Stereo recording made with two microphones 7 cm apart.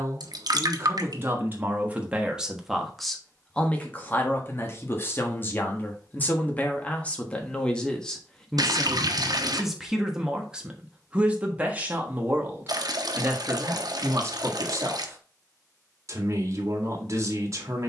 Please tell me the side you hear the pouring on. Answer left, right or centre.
right.